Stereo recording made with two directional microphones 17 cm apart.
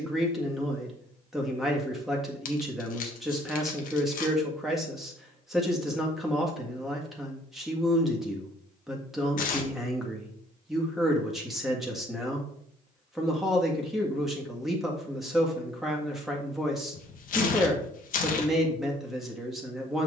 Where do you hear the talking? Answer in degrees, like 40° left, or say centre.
centre.